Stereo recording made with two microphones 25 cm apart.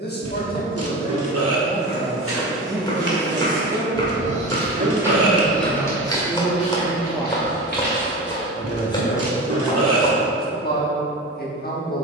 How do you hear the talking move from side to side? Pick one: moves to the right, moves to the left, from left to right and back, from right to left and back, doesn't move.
from left to right and back.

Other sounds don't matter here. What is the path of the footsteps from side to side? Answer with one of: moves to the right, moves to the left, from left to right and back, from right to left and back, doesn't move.
moves to the left.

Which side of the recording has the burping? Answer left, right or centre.
right.